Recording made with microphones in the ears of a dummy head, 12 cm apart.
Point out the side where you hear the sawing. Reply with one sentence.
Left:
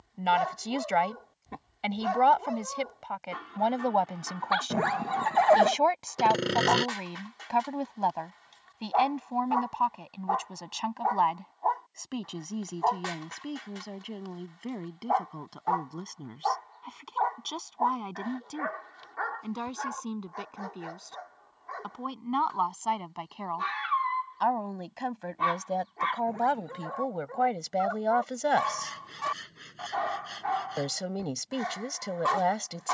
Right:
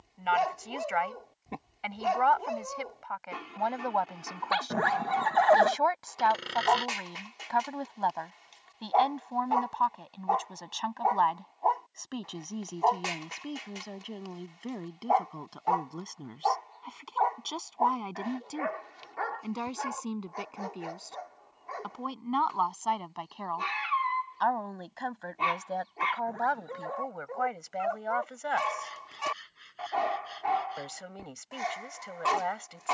You can hear the sawing on the left.